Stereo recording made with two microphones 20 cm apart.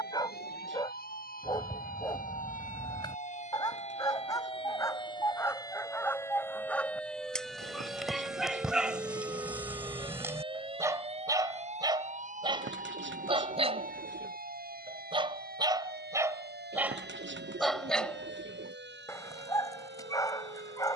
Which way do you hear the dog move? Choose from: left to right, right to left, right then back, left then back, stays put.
right then back.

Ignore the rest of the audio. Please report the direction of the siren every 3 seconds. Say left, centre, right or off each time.
left, left, centre, right, right, right, right.